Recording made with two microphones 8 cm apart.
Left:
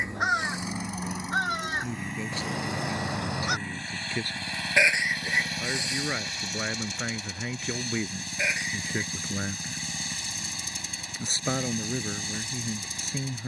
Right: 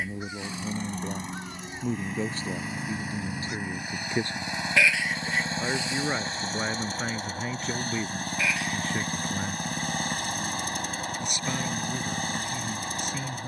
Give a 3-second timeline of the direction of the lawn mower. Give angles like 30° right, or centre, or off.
centre, 20° right, 40° right, 50° right, 50° right.